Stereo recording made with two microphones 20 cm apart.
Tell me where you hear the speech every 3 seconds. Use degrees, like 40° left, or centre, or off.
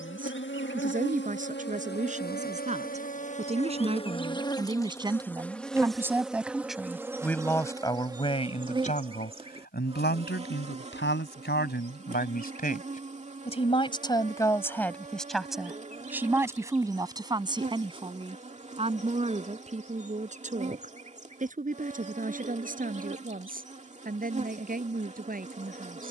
40° right, 20° right, 10° left, 60° left, 30° left, 10° right, 30° right, 40° right, 50° right.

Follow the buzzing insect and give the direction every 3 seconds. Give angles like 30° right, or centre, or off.
60° left, 20° left, 10° right, 30° right, 40° right, 40° right, 40° right, 40° right, 40° right.